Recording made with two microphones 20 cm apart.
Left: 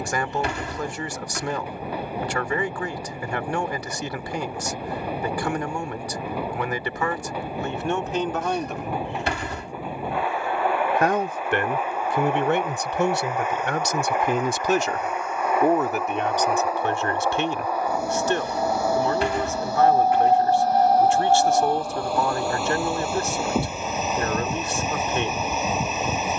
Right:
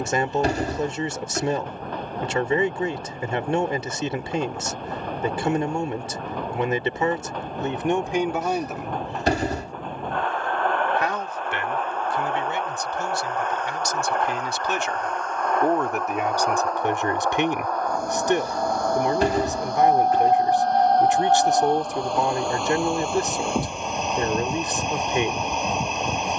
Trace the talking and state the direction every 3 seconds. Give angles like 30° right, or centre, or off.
20° right, 20° right, 20° right, 50° left, 60° left, 10° right, 20° right, 20° right, 20° right.